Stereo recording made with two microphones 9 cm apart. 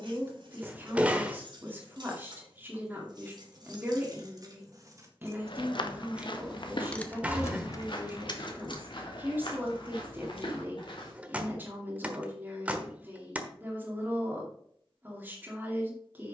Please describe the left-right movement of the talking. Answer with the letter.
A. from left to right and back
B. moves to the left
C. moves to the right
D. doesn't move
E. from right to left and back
D.